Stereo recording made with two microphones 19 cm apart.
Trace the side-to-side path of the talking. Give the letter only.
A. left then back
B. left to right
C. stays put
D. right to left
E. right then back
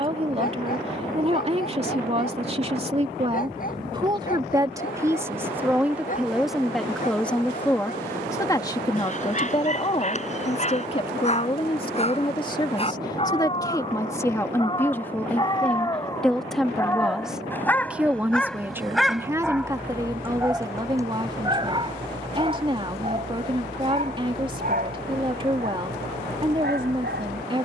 A.